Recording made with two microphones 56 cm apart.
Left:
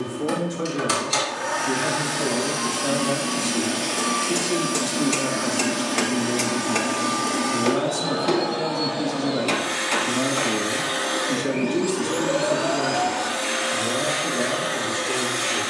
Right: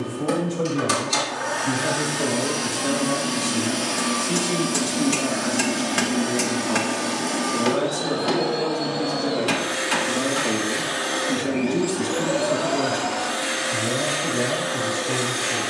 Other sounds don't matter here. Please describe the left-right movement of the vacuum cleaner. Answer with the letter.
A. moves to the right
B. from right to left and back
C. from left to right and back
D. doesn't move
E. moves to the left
B.